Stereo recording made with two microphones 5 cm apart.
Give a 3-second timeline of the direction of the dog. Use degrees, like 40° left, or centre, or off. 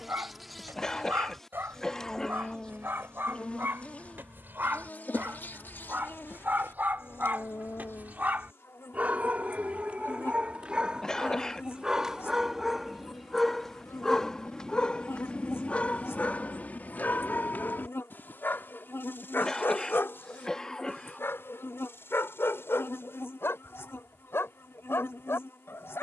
60° right, 50° right, 50° right, 30° right, centre, 40° left, 60° left, 70° left, 80° left.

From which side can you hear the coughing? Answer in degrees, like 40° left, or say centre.
20° left.